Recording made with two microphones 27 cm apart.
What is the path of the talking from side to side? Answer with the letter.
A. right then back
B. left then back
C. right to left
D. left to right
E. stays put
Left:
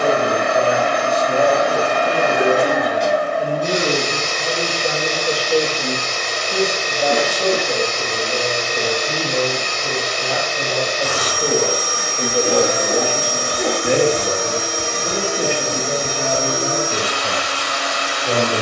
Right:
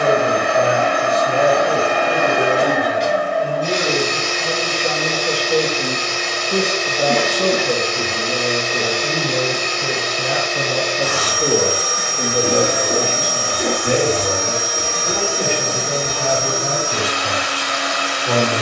A.